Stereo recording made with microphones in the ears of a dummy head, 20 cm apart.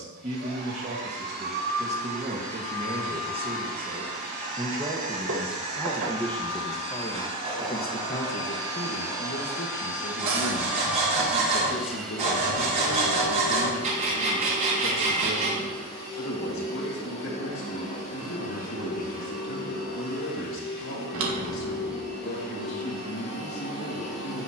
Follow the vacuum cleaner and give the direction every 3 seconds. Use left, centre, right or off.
right, right, right, centre, centre, left, left, left.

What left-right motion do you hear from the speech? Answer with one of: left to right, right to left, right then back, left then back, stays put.
right to left.